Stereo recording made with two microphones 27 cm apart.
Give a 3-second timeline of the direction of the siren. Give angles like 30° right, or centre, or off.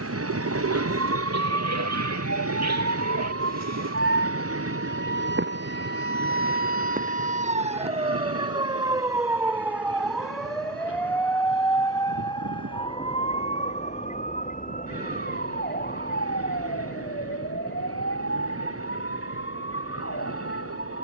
60° right, 50° right, 30° right, centre, 20° left, 40° left, 50° left.